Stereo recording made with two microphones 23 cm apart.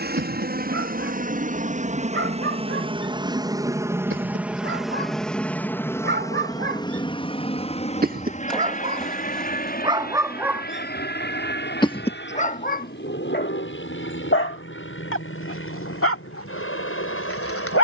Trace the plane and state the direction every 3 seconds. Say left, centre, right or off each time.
right, centre, left, left, left, left.